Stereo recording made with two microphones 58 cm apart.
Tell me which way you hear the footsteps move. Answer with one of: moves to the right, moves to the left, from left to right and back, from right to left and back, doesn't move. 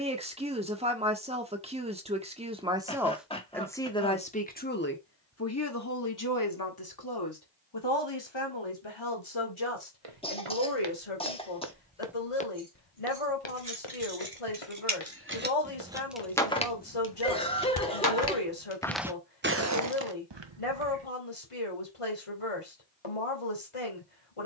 from right to left and back.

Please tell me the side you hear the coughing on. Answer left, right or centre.
centre.